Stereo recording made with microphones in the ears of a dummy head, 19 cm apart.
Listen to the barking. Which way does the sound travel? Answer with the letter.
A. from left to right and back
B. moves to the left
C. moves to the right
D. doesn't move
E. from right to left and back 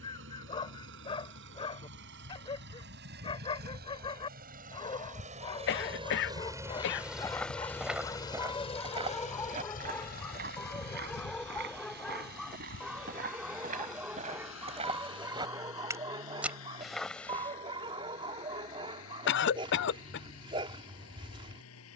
C.